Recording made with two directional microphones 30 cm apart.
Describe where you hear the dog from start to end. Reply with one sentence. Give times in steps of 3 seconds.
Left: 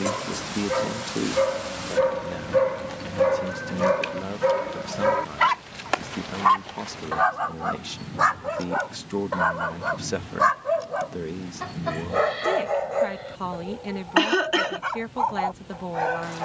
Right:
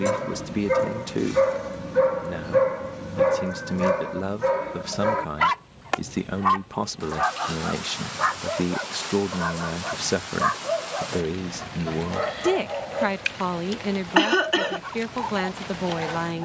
You can hear the dog on the right from 0 s, in the centre from 3 s and on the left from 6 s.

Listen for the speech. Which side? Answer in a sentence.
You can hear the speech on the right.